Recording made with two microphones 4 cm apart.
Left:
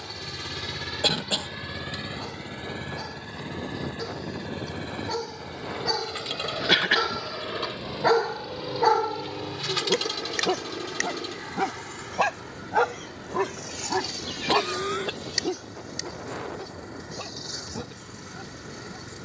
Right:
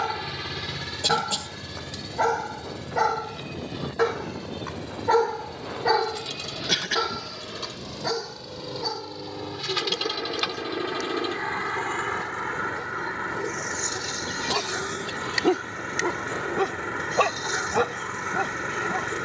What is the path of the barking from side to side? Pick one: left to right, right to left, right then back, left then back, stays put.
left then back.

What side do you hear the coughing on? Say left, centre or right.
left.